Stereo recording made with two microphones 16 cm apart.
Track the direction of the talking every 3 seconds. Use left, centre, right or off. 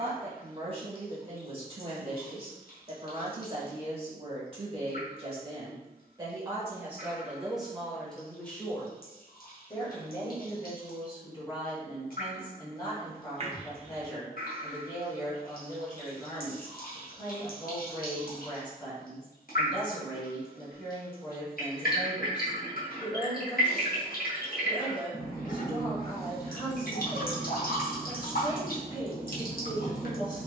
right, right, centre, left, left, left, left, left, left, left.